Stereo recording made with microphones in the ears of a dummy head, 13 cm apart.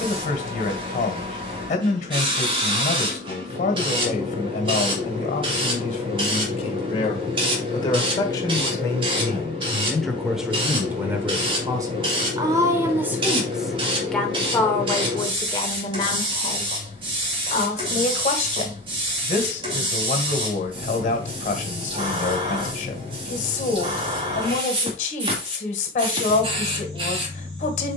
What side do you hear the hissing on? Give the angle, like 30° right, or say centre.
40° right.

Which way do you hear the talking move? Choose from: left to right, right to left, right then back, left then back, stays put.
right then back.